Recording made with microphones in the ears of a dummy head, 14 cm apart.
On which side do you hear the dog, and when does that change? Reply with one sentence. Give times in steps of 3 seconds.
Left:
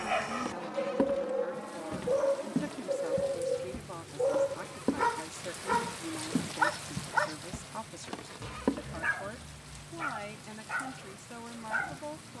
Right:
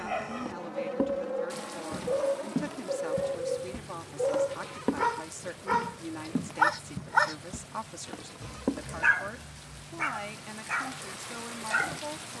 You can hear the dog on the left from 0 s, in the centre from 3 s and on the right from 6 s.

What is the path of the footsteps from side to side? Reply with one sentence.
In this clip you hear the footsteps go right and come back.